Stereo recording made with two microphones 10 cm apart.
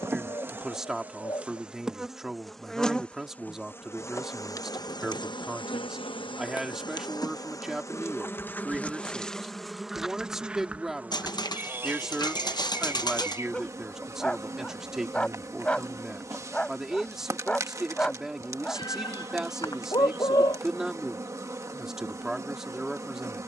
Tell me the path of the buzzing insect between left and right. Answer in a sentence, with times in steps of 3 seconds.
In this clip you hear the buzzing insect in the centre from 0 s, on the left from 3 s, in the centre from 9 s and on the right from 12 s.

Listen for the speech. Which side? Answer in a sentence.
You can hear the speech in the centre.